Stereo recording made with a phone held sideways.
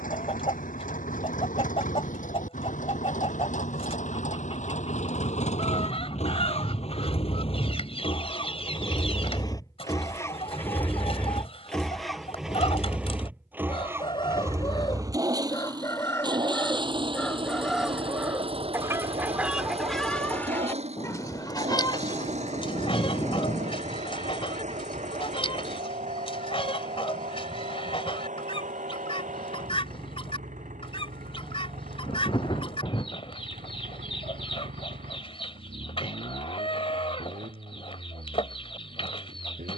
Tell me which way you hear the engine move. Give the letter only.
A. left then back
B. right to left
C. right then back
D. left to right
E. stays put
D.